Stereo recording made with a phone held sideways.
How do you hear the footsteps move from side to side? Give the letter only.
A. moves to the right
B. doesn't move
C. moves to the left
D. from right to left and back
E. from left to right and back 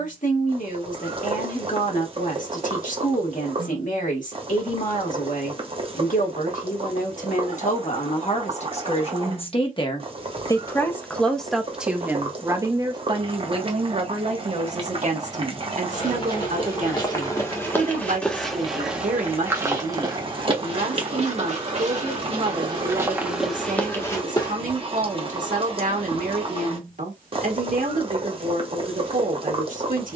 E.